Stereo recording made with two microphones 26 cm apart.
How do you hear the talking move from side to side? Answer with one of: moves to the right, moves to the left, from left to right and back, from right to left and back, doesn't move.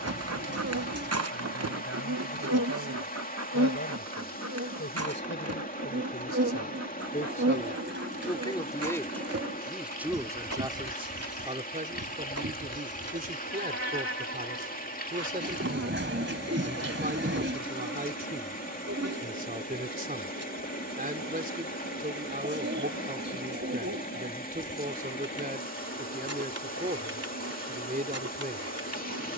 moves to the right.